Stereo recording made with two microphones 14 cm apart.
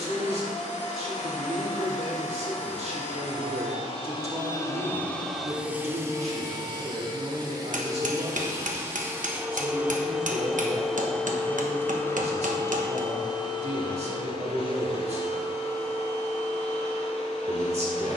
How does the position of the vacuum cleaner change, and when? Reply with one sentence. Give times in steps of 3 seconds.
In this clip you hear the vacuum cleaner on the left from 0 s, on the right from 6 s, in the centre from 9 s and on the left from 12 s.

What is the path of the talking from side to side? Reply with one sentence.
In this clip you hear the talking stay in one place.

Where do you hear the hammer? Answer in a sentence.
You can hear the hammer on the right.